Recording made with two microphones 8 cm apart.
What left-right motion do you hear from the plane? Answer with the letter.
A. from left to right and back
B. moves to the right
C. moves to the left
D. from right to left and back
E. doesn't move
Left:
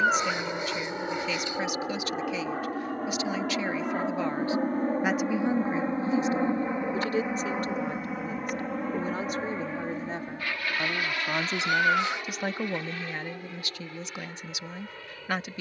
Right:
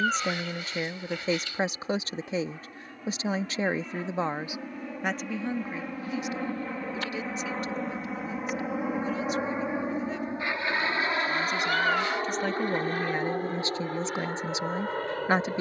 B.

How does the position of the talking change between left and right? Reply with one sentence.
You can hear the talking go left and come back.